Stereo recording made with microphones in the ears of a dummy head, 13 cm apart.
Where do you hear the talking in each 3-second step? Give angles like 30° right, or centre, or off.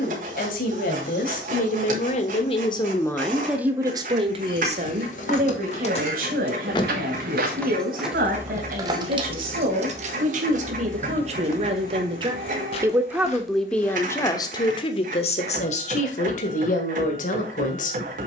50° left, 40° right, 70° right, 50° right, centre, 50° left.